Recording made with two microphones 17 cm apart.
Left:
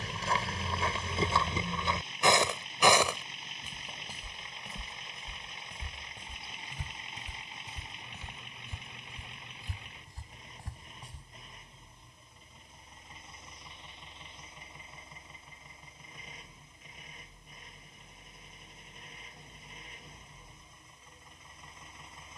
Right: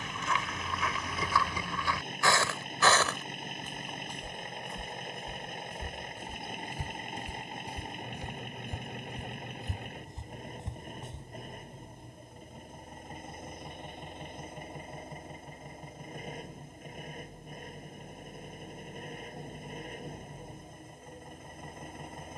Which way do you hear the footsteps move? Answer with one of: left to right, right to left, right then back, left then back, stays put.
left to right.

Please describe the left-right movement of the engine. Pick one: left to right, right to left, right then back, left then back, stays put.
stays put.